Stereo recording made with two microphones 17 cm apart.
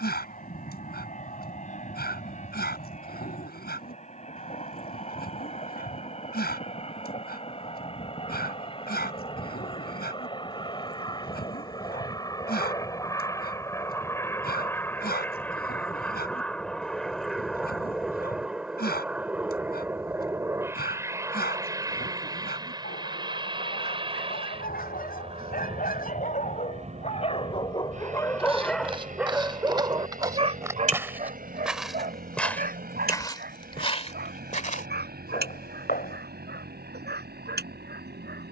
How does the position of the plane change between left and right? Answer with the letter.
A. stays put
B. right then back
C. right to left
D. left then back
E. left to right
E.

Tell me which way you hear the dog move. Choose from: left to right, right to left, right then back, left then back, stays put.
left to right.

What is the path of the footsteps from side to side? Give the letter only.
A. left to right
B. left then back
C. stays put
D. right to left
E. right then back
D.